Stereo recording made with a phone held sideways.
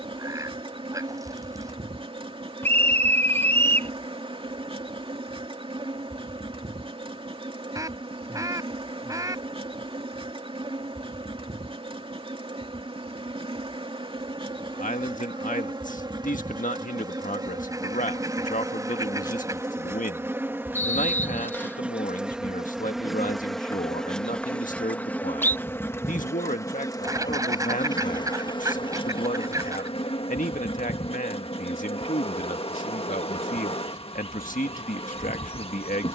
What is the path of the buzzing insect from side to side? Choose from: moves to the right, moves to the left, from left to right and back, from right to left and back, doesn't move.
moves to the left.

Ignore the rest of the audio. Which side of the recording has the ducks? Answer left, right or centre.
right.